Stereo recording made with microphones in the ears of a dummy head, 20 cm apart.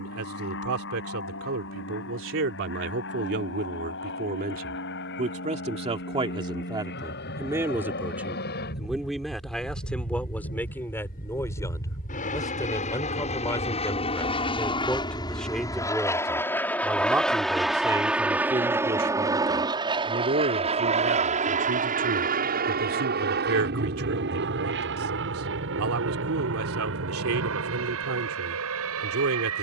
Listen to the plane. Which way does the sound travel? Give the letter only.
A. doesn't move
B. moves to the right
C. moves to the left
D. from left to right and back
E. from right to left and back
B.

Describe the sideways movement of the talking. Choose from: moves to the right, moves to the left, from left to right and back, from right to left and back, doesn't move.
from right to left and back.